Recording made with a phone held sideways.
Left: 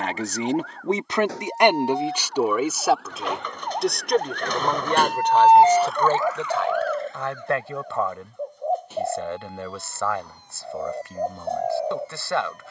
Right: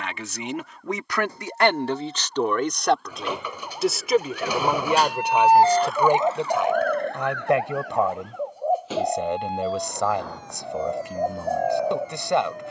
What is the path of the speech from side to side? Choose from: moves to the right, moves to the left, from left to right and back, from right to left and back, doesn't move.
moves to the right.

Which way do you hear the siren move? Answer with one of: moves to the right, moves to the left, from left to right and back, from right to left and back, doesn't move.
moves to the right.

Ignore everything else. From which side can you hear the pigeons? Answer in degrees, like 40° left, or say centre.
10° right.